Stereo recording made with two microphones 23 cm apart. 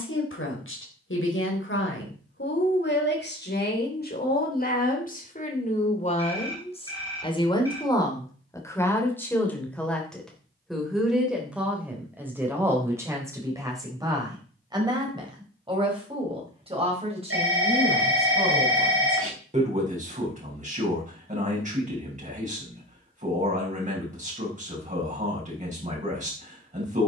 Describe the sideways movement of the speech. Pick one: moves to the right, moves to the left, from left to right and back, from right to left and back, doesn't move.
moves to the right.